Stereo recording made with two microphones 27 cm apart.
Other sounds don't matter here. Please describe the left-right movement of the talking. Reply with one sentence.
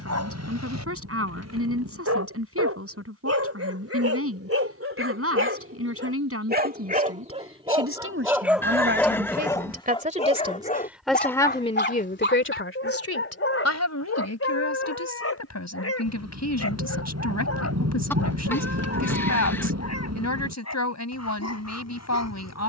In this clip you hear the talking travel towards the left.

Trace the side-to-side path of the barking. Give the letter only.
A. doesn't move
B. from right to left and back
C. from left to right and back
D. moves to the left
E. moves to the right
D.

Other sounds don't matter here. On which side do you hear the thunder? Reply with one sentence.
You can hear the thunder on the right.